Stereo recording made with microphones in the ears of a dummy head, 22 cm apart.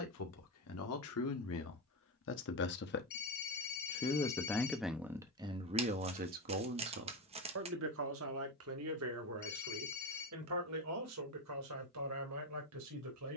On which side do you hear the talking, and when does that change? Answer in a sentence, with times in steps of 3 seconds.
In this clip you hear the talking on the left from 0 s, in the centre from 3 s and on the right from 6 s.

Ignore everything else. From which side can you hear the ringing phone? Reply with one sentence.
In this clip you hear the ringing phone on the left.